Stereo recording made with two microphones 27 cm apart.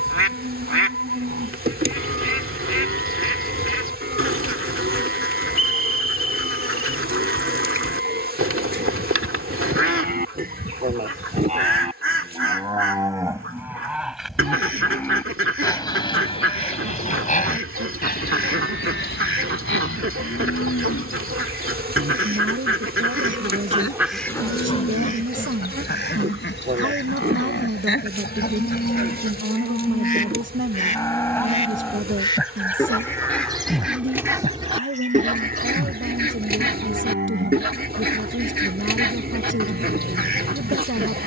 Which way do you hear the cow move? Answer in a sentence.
You can hear the cow move from right to left and back again.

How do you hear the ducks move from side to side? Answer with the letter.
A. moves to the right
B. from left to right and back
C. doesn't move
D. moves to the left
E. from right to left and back
E.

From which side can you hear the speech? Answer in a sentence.
In this clip you hear the speech on the right.